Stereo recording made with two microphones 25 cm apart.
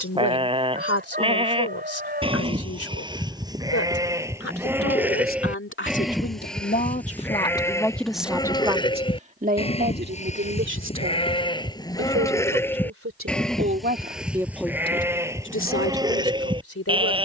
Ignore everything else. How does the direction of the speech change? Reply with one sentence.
You can hear the speech move from left to right and back again.